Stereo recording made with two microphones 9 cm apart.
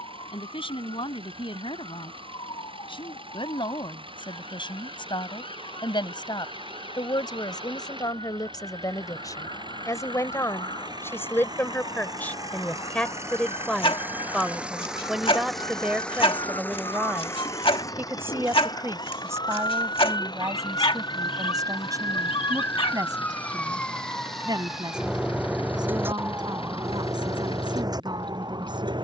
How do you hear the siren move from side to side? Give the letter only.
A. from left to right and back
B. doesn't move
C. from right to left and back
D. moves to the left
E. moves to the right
E.